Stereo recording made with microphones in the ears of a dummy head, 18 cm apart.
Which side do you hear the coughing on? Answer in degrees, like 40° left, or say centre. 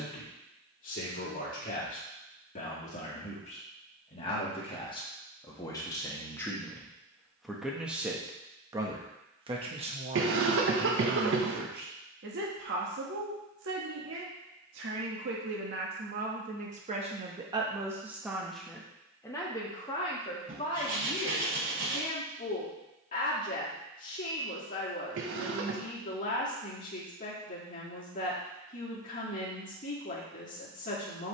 60° right.